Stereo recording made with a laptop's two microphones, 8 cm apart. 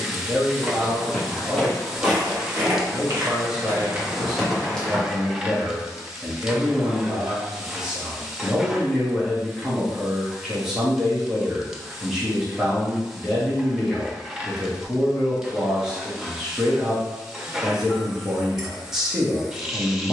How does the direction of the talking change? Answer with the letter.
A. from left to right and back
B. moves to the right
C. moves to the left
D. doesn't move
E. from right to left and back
D.